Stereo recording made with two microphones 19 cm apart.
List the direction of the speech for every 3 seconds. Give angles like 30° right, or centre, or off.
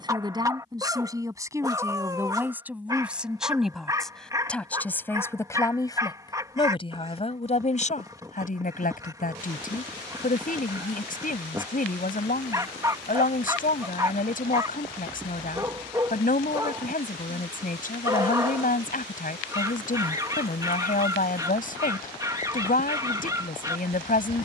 10° right, 10° left, 30° left, 40° left, 40° left, 40° left, 40° left, 40° left.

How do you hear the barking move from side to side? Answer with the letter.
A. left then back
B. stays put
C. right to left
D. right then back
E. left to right
B.